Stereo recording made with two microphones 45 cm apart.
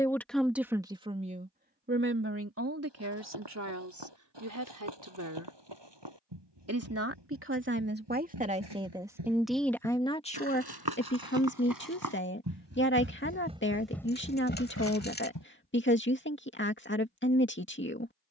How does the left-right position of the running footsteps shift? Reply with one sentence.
In this clip you hear the running footsteps go from the right side to the left.